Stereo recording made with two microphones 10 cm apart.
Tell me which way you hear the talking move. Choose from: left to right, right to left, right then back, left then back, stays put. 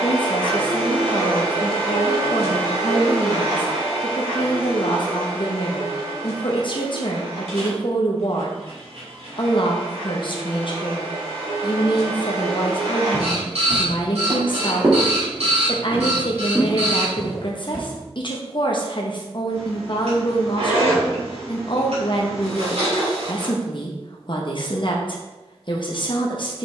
stays put.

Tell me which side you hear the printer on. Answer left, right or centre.
right.